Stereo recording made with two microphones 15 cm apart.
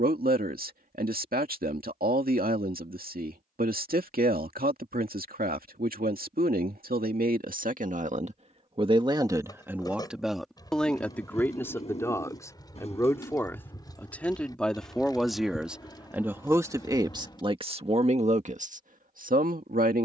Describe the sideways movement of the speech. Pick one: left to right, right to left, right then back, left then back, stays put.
left then back.